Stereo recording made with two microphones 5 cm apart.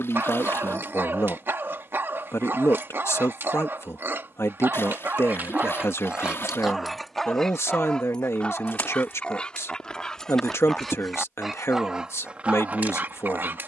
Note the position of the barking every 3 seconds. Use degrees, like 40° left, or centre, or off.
50° right, 50° right, 10° left, 10° left, 40° right.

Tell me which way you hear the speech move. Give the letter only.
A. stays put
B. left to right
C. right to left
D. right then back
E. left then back
A.